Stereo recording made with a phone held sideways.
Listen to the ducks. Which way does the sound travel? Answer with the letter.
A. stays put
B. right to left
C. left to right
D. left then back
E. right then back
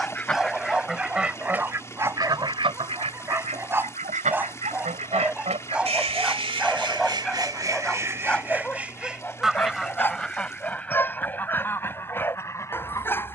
E.